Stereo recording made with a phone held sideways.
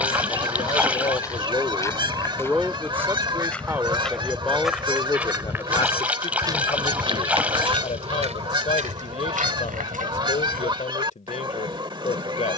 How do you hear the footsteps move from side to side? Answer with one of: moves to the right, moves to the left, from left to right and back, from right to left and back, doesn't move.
moves to the right.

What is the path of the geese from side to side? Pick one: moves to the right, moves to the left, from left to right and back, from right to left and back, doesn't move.
doesn't move.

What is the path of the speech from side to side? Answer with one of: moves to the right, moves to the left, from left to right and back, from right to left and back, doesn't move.
from left to right and back.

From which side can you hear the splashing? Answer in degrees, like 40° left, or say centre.
10° right.